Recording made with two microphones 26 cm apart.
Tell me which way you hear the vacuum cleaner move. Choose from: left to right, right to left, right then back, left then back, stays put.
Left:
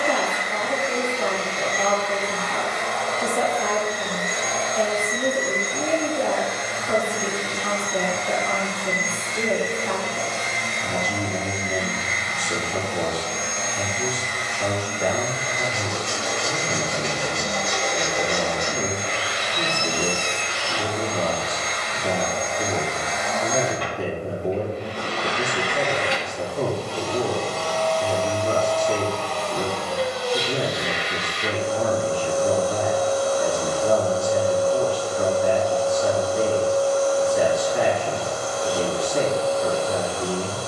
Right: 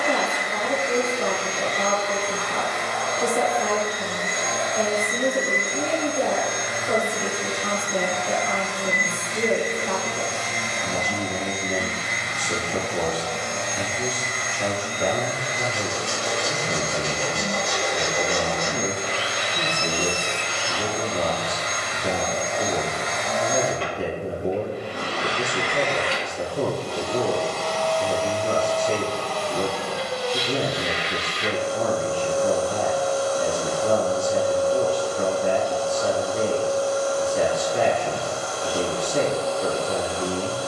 right to left.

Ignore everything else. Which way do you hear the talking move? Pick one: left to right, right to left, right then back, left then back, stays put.
stays put.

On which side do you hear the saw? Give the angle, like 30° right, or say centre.
30° right.